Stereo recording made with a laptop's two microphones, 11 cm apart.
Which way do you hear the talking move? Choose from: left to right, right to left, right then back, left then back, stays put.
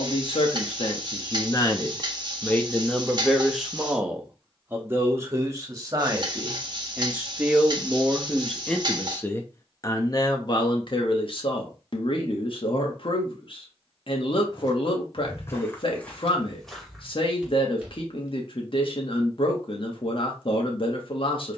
right then back.